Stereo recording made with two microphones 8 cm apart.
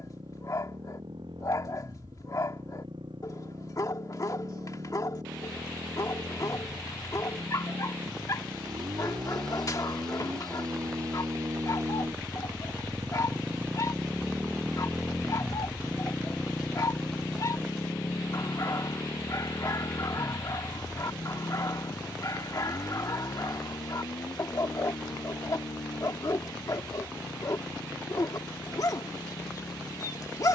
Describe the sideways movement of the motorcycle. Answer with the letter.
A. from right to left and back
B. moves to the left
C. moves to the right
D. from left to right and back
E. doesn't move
B.